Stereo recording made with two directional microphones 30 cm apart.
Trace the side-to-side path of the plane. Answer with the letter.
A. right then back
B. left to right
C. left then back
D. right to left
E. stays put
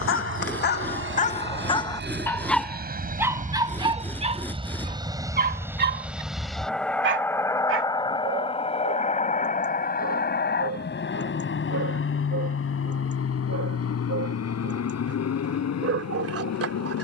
D.